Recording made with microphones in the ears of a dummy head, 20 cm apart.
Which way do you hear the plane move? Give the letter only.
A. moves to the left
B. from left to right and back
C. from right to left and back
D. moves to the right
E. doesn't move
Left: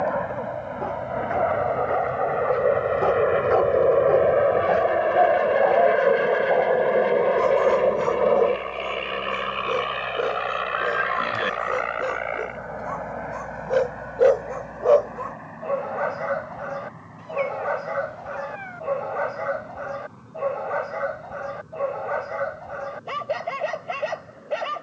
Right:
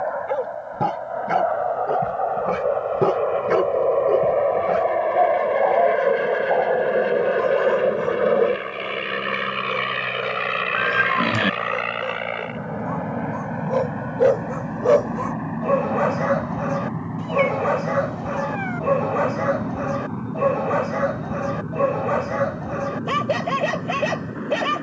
D.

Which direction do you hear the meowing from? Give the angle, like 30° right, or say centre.
60° right.